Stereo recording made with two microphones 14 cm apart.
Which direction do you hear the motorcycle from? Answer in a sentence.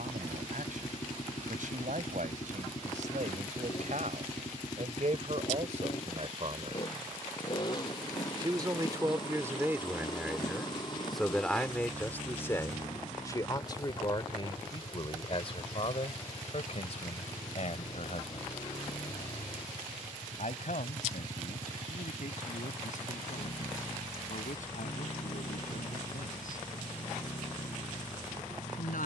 In this clip you hear the motorcycle on the left.